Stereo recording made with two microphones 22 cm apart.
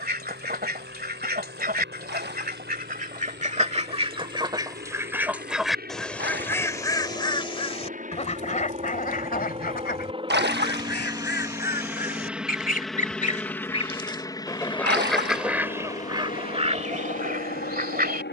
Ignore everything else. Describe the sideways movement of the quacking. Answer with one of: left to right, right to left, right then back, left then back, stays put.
left then back.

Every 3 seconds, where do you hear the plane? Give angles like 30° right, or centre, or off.
60° right, 50° right, 40° right, 20° right, 10° left, 40° left.